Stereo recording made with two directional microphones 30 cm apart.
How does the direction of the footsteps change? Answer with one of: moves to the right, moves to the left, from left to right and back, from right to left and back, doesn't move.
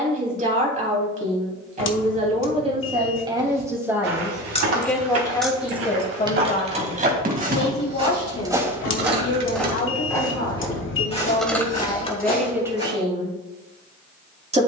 moves to the left.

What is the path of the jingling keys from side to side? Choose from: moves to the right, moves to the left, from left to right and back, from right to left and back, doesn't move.
from left to right and back.